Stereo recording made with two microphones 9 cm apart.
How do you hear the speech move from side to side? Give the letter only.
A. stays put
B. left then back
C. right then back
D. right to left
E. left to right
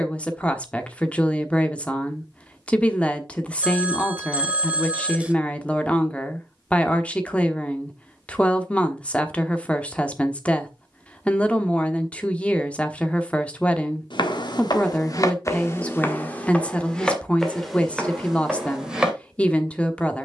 A.